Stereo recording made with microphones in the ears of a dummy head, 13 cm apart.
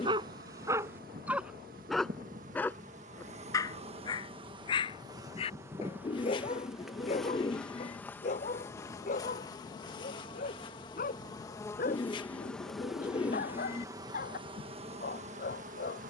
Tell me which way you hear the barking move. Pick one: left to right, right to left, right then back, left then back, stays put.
right to left.